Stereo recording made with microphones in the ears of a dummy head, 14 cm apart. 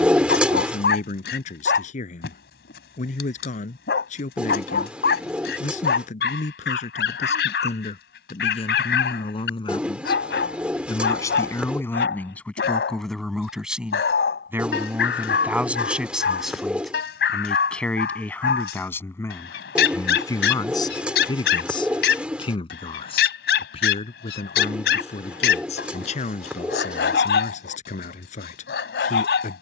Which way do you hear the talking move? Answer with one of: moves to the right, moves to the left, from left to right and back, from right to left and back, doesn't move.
from left to right and back.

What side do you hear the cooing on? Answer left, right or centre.
centre.